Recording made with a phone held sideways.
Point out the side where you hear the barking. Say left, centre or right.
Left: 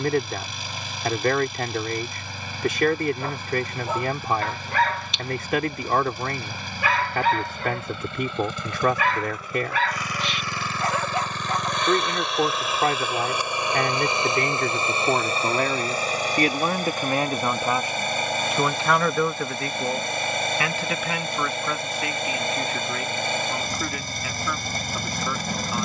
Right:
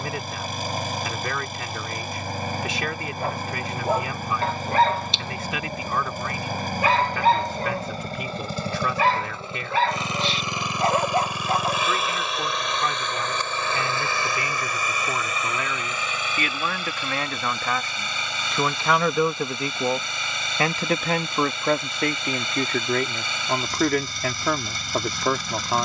right.